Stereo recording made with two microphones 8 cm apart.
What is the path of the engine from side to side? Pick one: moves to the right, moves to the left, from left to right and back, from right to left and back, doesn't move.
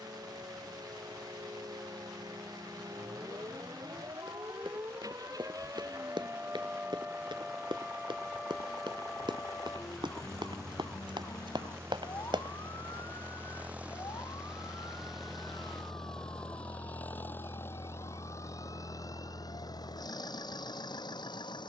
moves to the left.